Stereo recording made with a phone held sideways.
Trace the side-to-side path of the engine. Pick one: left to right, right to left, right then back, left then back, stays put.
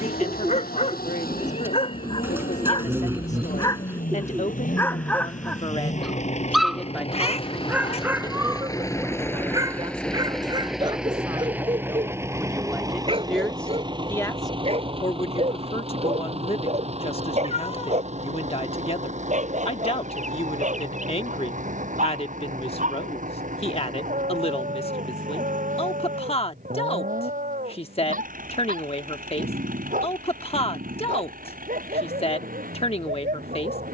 left to right.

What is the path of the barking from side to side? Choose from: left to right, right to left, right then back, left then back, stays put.
left to right.